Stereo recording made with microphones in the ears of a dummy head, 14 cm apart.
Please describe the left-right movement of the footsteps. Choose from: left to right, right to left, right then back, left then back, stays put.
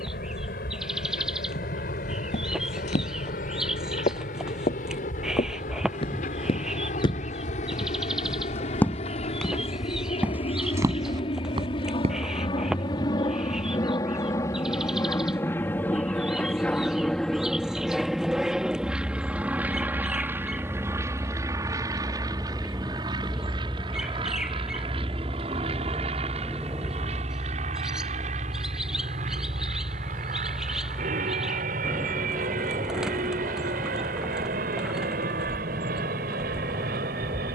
left to right.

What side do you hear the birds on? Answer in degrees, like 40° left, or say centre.
centre.